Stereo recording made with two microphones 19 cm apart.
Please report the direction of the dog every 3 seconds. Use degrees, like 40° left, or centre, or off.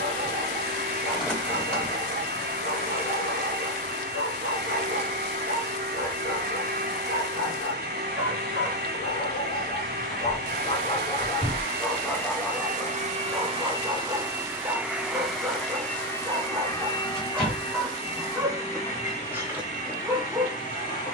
80° left, 80° left, 80° left, 40° left, 10° right, 10° right, 10° right.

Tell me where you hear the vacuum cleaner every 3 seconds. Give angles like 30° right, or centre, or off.
60° right, 60° right, 60° right, 60° right, 30° right, 10° left, 40° left.